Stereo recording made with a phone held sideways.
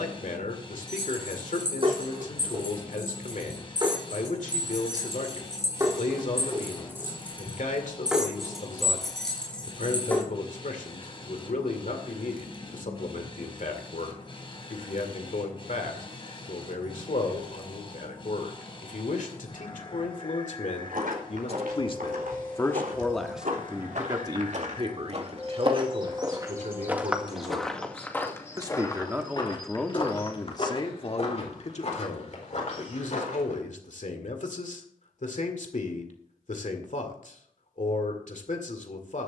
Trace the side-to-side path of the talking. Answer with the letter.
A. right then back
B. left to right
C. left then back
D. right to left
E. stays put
A.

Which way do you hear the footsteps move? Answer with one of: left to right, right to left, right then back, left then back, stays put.
right to left.